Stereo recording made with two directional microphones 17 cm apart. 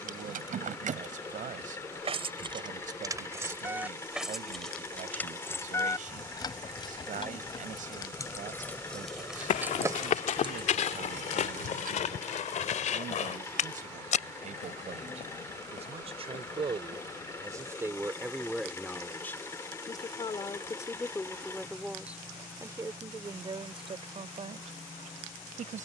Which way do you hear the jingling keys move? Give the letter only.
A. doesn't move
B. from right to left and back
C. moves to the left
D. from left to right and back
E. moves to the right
B.